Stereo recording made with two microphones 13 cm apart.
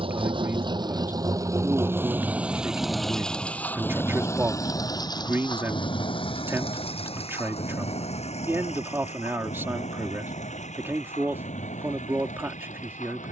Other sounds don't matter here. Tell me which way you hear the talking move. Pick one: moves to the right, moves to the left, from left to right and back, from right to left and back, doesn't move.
doesn't move.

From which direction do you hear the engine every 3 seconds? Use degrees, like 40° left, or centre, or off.
20° right, 20° left, 50° left, 60° left, 70° left.